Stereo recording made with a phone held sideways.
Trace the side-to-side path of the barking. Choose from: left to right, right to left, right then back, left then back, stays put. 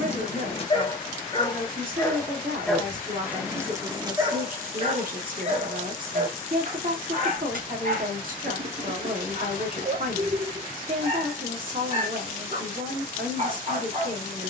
left to right.